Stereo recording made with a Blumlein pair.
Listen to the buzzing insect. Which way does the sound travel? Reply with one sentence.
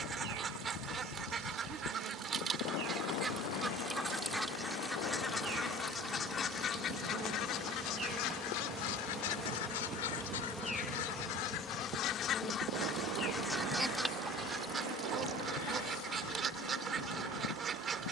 You can hear the buzzing insect go from the right side to the left.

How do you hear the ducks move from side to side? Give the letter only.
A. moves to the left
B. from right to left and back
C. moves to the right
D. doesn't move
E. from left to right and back
B.